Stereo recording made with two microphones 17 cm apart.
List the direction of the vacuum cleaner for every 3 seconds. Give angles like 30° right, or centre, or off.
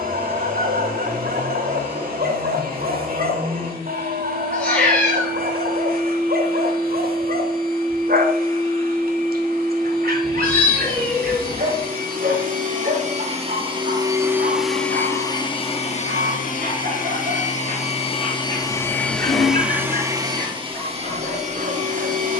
60° right, 60° right, 60° right, 60° right, 30° right, 40° left, centre, 50° right.